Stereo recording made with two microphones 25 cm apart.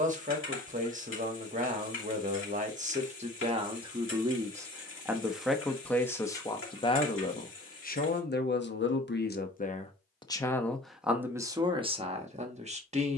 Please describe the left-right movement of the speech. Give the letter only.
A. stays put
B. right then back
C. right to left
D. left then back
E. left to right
D.